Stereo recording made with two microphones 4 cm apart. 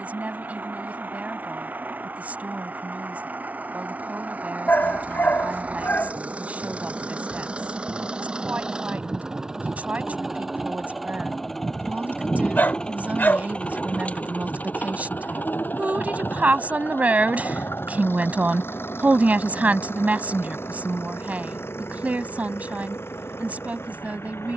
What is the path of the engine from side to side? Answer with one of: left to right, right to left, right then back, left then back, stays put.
right to left.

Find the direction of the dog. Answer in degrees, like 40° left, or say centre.
50° left.